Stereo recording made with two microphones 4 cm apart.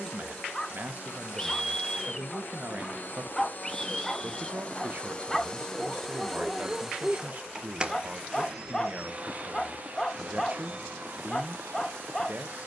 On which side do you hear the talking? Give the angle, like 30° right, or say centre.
40° right.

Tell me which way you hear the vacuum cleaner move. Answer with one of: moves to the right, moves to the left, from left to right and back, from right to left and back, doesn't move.
moves to the right.